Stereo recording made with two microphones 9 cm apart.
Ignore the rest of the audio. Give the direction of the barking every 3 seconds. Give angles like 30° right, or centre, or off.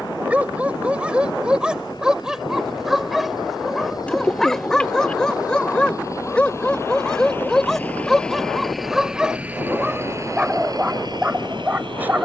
10° right, centre, centre, 10° right.